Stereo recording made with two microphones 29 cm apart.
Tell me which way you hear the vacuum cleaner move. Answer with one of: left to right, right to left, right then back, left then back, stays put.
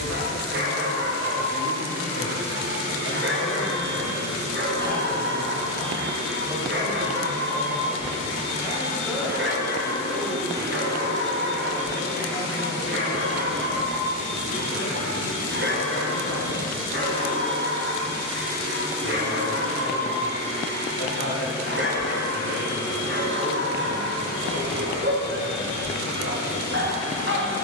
stays put.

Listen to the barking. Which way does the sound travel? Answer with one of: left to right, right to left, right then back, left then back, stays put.
stays put.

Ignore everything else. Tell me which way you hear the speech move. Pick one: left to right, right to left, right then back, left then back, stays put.
right then back.